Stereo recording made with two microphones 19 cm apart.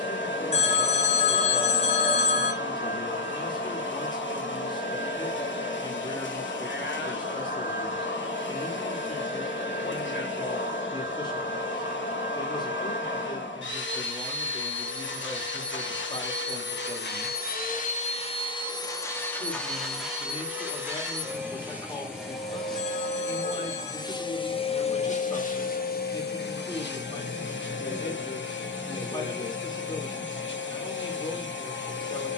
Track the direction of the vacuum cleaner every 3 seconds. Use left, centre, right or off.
left, left, left, left, left, left, centre, centre, left, left, left.